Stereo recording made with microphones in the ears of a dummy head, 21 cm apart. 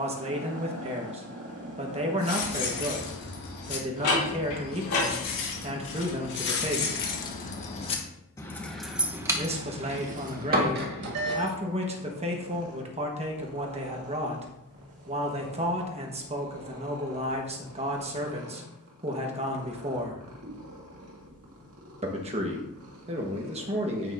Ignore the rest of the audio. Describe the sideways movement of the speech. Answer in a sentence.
In this clip you hear the speech stay put.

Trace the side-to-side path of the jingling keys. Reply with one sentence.
In this clip you hear the jingling keys go from the left side to the right.